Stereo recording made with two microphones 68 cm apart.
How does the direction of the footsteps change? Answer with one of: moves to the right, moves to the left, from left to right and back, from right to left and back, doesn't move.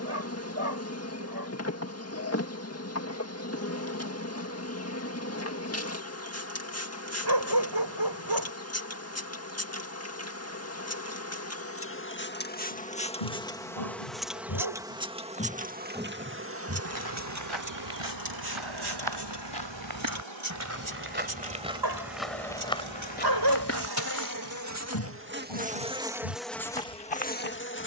from left to right and back.